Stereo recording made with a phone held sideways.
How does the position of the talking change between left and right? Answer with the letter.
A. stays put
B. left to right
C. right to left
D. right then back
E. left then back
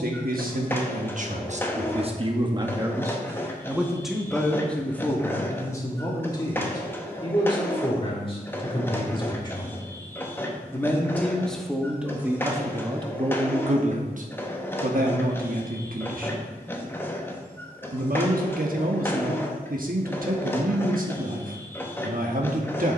E.